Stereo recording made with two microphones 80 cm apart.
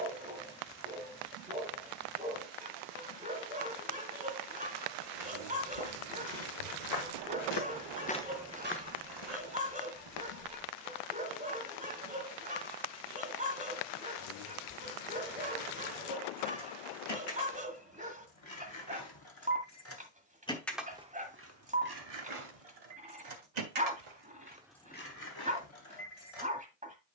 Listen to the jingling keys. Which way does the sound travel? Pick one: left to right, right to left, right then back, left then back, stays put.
right then back.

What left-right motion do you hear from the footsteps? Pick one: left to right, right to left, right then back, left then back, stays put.
left to right.